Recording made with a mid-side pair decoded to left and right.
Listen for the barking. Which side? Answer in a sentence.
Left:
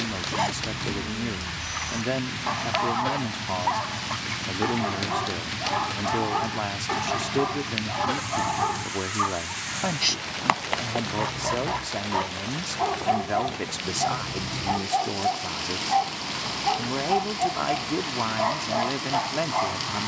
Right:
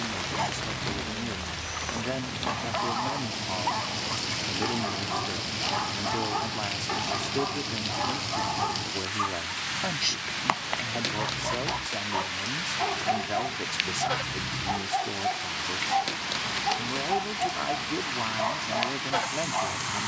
In this clip you hear the barking on the left.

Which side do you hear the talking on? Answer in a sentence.
You can hear the talking on the left.